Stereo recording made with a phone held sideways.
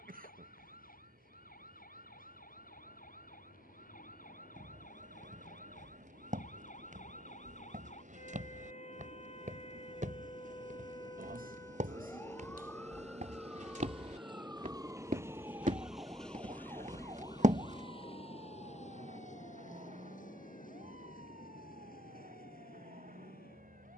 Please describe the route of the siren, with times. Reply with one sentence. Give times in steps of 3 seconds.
In this clip you hear the siren on the left from 0 s, in the centre from 12 s and on the right from 15 s.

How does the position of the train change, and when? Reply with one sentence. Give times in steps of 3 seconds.
You can hear the train on the right from 0 s, in the centre from 15 s and on the left from 18 s.